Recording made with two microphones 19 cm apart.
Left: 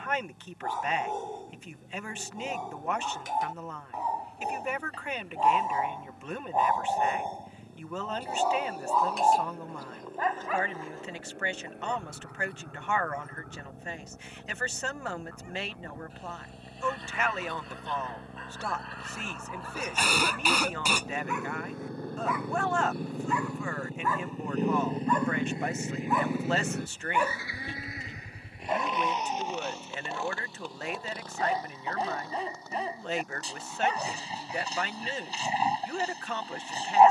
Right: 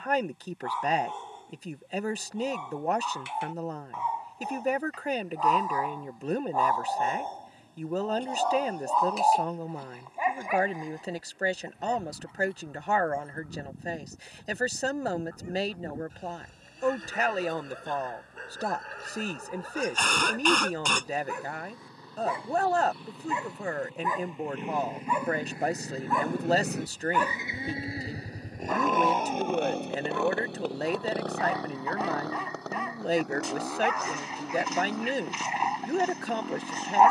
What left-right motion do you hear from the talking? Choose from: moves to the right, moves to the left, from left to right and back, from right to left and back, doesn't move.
doesn't move.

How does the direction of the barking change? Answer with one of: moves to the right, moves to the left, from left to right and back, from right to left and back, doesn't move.
from left to right and back.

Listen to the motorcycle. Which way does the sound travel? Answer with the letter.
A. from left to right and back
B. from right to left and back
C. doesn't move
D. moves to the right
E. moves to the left
D.